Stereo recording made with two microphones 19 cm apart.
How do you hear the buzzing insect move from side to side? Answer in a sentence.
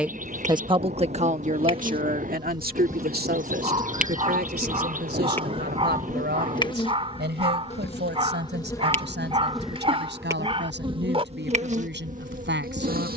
In this clip you hear the buzzing insect move from right to left and back again.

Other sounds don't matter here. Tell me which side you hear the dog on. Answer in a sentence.
In this clip you hear the dog on the right.